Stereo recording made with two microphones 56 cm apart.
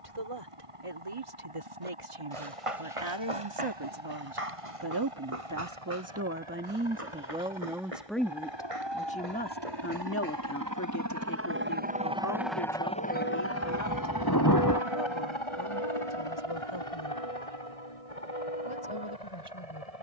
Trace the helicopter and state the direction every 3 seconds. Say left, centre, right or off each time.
right, right, right, right, left, left, left.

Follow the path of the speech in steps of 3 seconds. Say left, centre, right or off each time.
right, right, centre, left, left, left, left.